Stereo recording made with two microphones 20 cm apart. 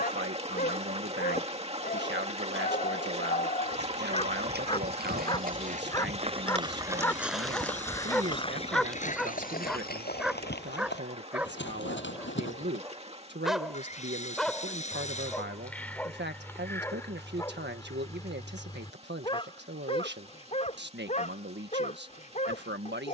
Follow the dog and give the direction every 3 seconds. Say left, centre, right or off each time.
left, left, centre, centre, centre, centre, left, left.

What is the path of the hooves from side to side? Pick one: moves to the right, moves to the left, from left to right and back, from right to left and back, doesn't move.
moves to the left.